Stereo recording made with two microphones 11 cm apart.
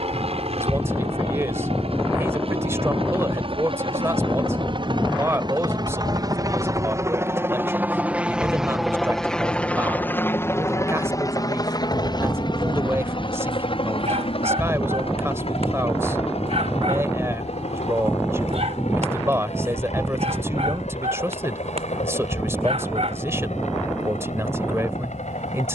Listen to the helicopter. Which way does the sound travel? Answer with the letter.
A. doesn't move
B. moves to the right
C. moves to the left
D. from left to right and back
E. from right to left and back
C.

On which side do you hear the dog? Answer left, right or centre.
right.